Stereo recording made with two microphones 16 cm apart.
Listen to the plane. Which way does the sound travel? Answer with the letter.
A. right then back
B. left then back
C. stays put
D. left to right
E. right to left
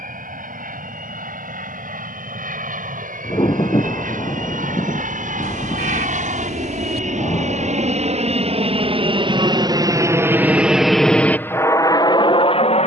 E.